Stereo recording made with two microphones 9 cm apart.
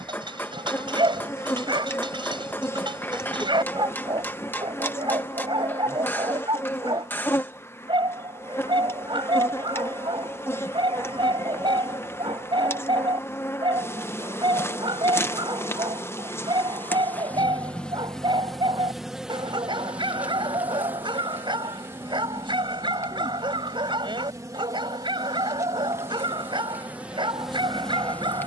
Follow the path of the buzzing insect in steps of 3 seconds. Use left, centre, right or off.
left, left, left, left, left, left, centre, right, right, centre.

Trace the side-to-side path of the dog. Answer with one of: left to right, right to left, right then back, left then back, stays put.
stays put.